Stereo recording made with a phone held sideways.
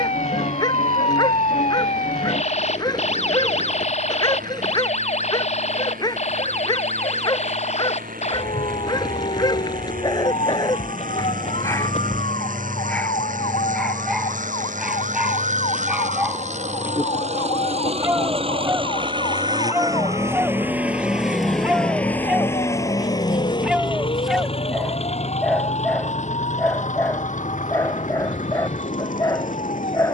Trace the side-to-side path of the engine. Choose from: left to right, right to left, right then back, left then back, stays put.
right to left.